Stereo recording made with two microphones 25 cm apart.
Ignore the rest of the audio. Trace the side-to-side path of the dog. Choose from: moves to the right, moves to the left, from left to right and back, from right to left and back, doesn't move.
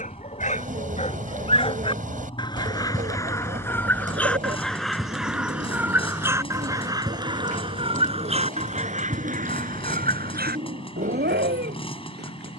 moves to the right.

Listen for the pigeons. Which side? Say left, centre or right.
right.